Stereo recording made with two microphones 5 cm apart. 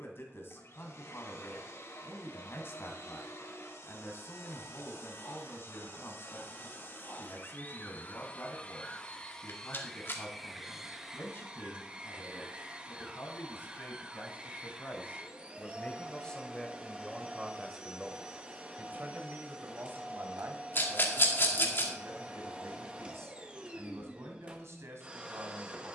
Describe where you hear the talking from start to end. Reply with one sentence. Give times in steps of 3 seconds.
In this clip you hear the talking on the left from 0 s, in the centre from 15 s and on the right from 18 s.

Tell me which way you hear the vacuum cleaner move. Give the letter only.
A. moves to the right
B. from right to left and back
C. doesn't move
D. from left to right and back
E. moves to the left
A.